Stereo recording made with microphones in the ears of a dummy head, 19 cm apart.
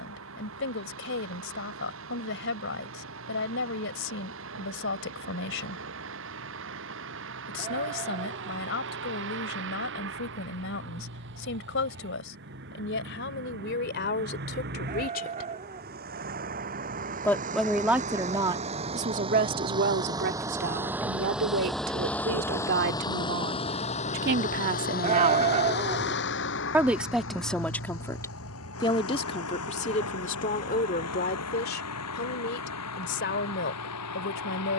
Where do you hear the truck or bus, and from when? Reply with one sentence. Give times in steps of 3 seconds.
You can hear the truck or bus on the right from 0 s, in the centre from 21 s and on the left from 24 s.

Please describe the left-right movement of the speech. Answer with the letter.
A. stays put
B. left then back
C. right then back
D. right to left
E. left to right
C.